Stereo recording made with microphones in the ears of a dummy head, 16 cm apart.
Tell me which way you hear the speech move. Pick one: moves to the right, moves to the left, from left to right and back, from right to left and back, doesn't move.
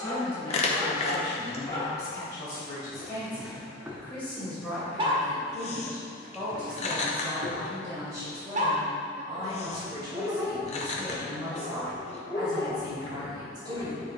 moves to the right.